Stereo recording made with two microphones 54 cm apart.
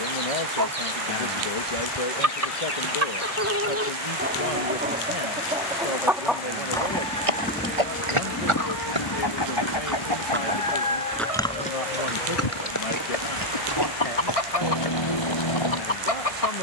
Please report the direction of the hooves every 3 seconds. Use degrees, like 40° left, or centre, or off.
off, off, 60° right, centre, 40° left, 50° left.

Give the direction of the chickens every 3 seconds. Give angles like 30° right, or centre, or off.
30° right, 20° right, 20° left, 60° left, 70° left, 70° left.